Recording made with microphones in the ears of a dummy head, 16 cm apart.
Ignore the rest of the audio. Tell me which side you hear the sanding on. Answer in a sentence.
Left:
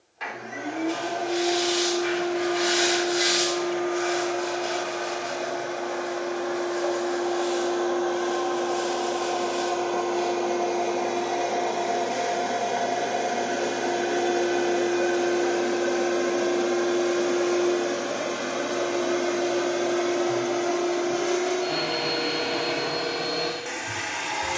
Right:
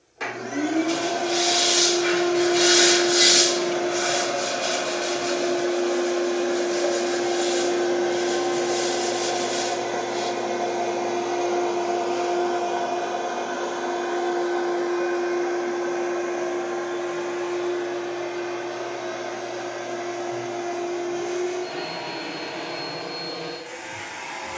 You can hear the sanding on the right.